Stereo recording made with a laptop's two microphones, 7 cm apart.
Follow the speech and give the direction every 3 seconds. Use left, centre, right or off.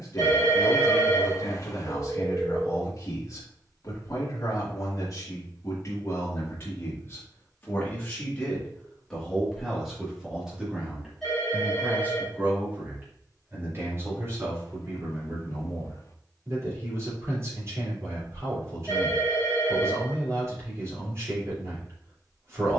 left, left, left, centre, right, right, right, right.